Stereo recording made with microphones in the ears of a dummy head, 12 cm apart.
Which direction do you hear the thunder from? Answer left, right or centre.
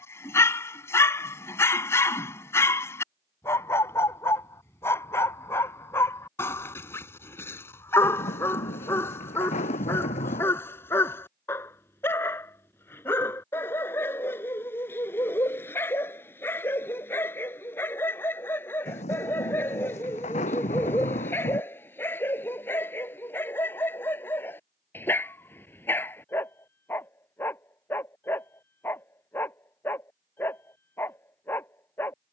left.